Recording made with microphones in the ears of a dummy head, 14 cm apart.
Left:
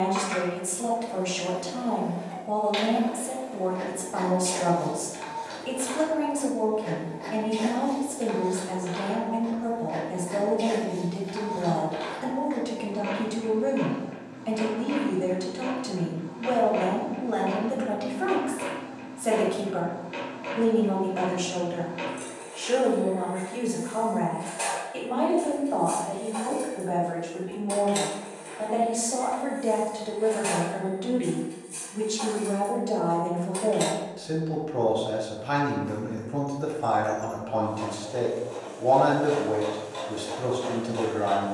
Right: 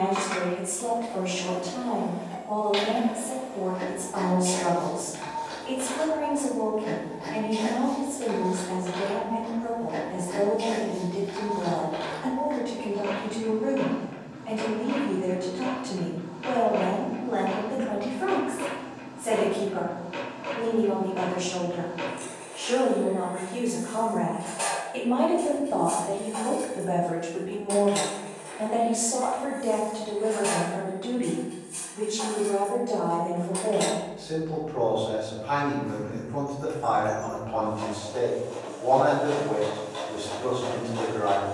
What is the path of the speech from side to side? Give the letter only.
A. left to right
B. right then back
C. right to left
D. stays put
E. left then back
B.